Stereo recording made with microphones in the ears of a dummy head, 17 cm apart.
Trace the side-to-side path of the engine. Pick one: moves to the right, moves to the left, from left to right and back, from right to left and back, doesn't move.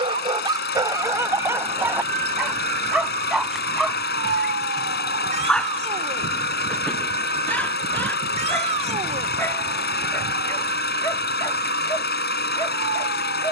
doesn't move.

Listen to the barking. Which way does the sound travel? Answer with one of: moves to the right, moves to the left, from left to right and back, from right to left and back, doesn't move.
moves to the left.